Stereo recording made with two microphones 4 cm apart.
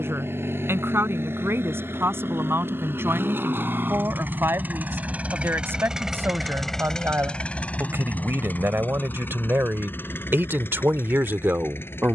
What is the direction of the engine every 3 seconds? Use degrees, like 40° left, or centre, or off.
70° right, 50° right, 30° left, 60° left.